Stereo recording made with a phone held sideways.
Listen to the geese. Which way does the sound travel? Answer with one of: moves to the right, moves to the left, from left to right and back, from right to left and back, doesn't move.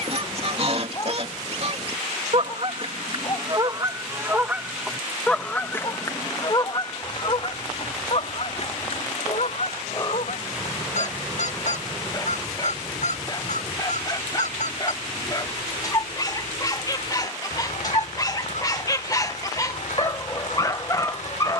moves to the left.